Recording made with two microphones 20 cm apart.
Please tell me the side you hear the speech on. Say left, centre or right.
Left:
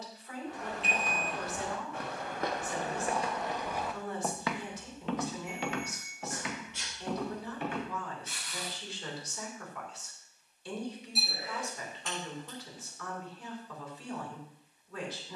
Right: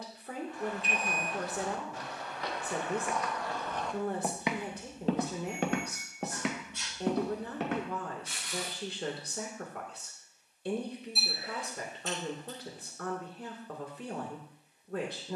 right.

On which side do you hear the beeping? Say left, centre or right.
left.